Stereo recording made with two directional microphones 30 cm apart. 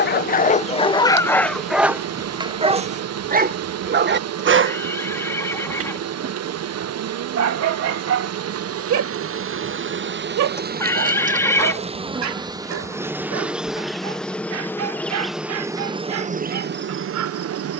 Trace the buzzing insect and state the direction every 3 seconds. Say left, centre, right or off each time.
right, right, right, right, centre, right.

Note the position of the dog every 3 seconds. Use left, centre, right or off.
centre, right, right, right, right, right.